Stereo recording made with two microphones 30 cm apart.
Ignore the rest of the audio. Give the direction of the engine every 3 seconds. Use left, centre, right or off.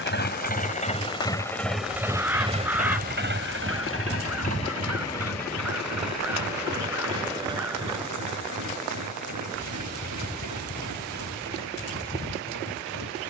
centre, right, right, right, right.